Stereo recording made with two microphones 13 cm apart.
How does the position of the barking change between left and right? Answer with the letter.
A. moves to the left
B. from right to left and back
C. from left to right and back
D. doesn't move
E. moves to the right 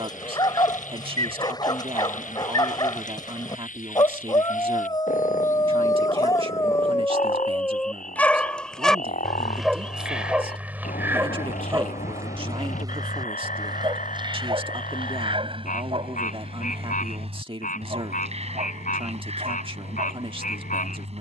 E.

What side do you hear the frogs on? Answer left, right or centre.
left.